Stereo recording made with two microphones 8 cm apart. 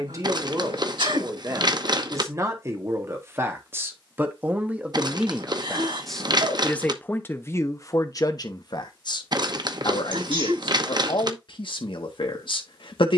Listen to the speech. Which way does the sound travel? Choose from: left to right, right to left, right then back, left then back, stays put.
right to left.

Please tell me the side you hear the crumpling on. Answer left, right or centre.
right.